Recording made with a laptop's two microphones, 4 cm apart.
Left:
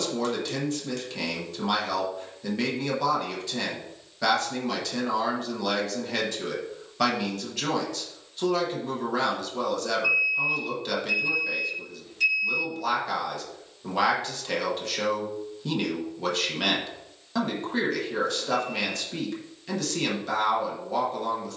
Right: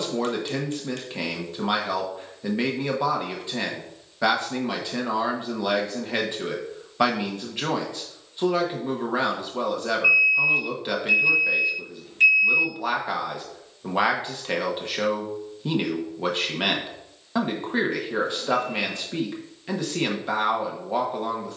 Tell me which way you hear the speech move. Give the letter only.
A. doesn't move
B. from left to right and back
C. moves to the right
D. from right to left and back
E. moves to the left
A.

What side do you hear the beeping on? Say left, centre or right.
right.